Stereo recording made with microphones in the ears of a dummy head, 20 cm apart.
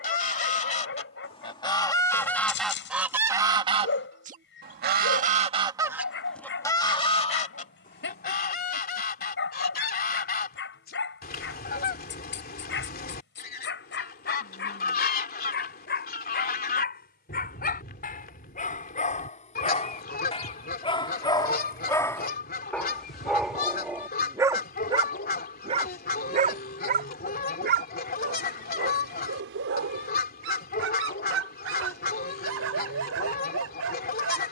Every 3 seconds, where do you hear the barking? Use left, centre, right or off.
left, left, left, left, left, left, left, centre, right, right, right, right.